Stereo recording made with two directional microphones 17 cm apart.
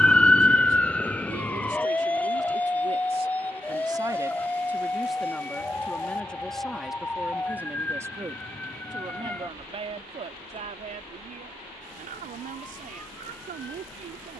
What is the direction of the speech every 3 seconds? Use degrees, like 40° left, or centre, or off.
50° right, 10° right, 10° right, 40° right, 50° right.